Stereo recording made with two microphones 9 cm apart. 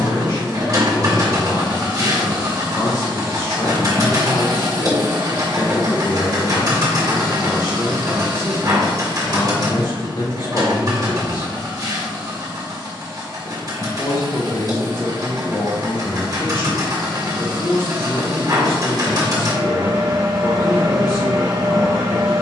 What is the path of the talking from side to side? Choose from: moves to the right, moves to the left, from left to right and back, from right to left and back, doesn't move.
doesn't move.